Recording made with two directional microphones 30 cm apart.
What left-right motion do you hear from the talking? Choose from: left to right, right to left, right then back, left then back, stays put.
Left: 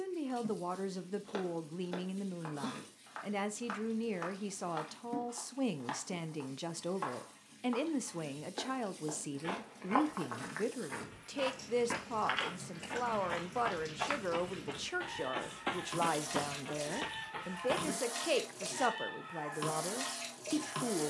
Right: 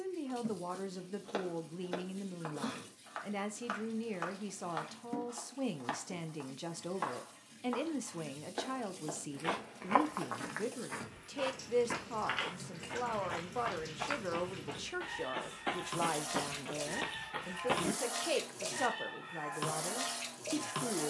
stays put.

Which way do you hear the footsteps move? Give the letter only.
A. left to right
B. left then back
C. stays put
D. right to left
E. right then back
B.